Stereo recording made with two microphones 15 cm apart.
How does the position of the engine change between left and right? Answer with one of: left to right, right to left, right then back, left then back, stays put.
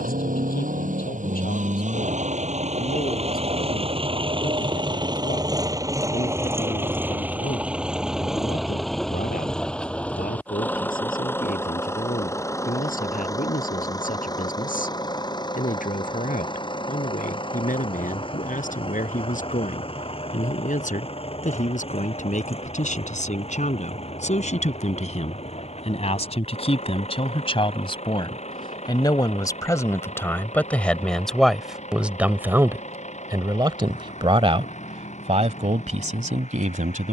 right to left.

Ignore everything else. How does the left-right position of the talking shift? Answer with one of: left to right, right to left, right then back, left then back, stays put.
left to right.